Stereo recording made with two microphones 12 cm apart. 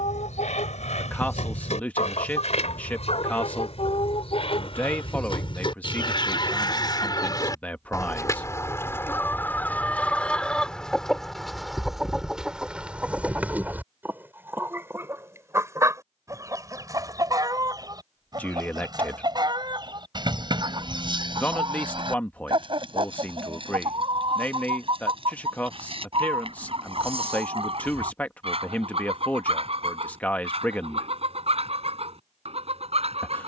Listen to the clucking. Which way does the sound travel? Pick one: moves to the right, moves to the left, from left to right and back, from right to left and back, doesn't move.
moves to the right.